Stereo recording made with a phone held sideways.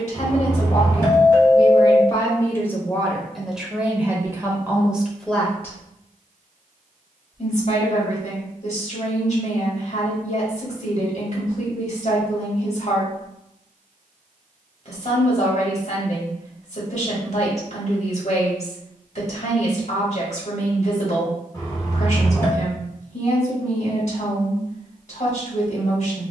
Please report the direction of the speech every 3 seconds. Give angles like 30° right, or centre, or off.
30° left, centre, 50° left, 50° left, 50° left, 50° left, 50° left, 50° left, 50° left.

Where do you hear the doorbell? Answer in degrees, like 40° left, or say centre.
20° left.